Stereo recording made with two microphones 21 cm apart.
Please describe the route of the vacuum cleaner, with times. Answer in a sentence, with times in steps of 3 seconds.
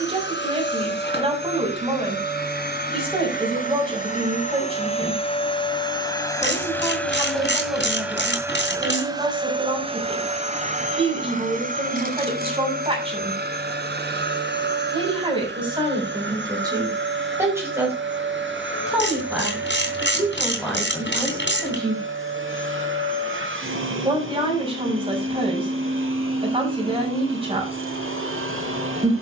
In this clip you hear the vacuum cleaner on the left from 0 s, in the centre from 6 s and on the right from 9 s.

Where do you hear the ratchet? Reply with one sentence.
In this clip you hear the ratchet on the left.